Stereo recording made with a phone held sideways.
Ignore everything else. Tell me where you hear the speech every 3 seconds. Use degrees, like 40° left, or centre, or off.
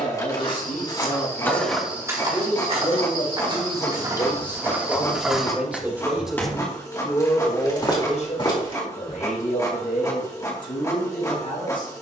70° left, 30° left, 30° left, 70° left.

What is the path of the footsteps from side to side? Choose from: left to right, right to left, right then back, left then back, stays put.
right then back.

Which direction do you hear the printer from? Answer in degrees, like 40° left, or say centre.
20° left.